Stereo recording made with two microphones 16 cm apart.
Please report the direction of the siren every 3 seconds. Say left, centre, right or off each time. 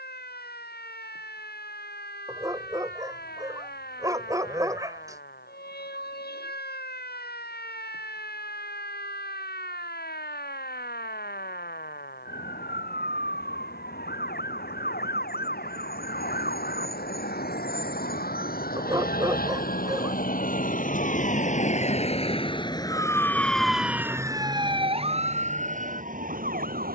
left, left, left, left, left, left, left, left, right.